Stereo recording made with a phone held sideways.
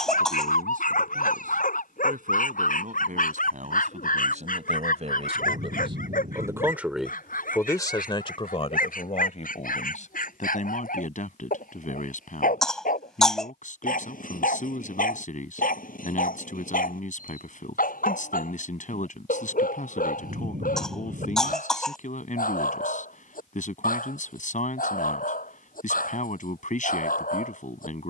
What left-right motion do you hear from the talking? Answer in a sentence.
You can hear the talking travel towards the left.